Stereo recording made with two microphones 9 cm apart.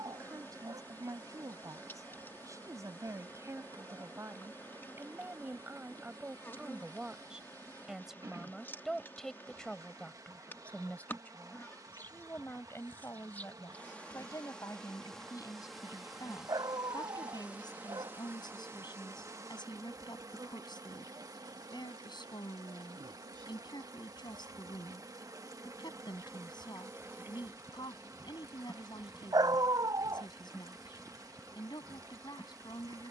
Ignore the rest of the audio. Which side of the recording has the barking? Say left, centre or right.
right.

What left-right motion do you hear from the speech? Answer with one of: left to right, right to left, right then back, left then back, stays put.
right to left.